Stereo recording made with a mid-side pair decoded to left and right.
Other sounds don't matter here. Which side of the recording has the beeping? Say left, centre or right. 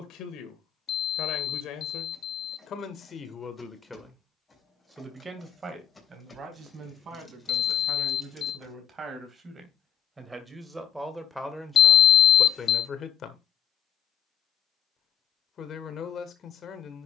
left.